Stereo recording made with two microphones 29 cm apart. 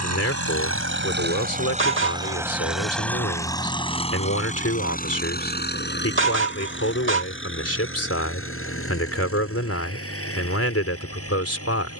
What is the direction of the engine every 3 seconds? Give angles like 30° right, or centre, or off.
30° right, 20° left, 40° left, 50° left.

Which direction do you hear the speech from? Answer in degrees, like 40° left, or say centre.
50° left.